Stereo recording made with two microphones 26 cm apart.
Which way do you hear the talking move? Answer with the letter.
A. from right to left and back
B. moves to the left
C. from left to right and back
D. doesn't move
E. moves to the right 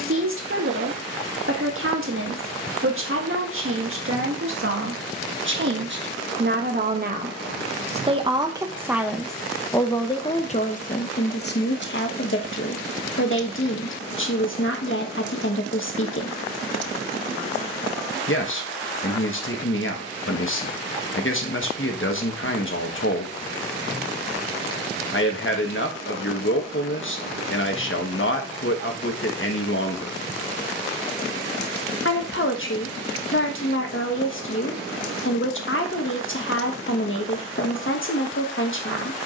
B.